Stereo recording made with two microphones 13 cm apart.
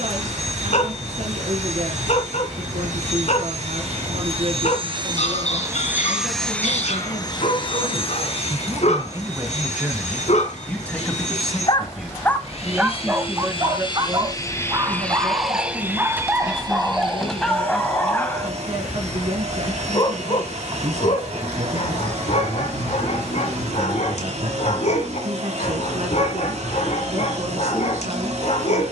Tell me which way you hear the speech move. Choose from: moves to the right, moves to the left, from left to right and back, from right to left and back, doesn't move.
from right to left and back.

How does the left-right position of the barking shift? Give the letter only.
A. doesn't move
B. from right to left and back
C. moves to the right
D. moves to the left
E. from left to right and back
E.